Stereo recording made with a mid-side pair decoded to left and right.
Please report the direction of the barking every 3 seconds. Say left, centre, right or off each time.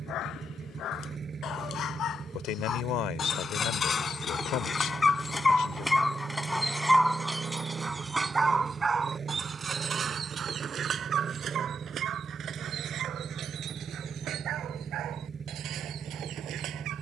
left, left, centre, right, right, right.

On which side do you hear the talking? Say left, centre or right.
left.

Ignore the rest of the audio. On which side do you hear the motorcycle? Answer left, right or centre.
right.